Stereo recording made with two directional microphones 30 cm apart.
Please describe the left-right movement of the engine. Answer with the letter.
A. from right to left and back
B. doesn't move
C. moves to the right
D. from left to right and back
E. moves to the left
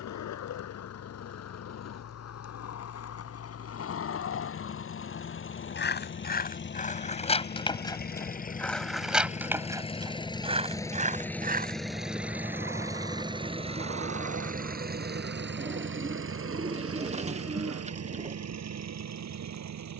C.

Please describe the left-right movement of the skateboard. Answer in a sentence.
You can hear the skateboard move from left to right.